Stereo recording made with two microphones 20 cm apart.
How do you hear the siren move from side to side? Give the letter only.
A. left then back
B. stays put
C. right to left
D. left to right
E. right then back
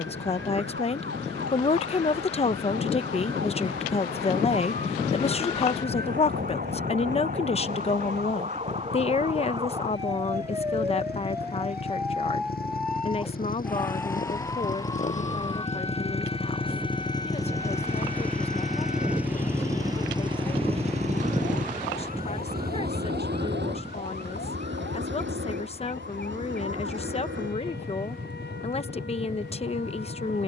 C.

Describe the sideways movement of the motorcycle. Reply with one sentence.
You can hear the motorcycle travel towards the right.